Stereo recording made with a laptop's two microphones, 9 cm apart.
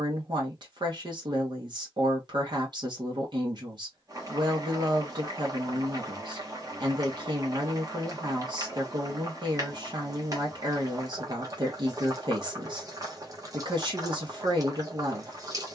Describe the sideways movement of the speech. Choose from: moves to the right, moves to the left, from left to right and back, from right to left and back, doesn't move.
doesn't move.